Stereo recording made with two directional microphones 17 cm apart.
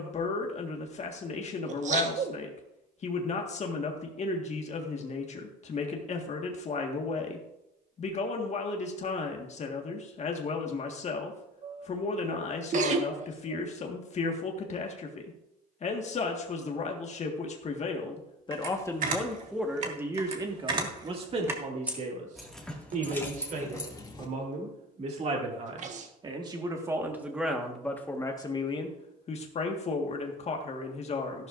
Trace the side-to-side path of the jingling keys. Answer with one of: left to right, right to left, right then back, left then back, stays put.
right to left.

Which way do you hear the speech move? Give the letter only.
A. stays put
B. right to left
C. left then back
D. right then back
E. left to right
D.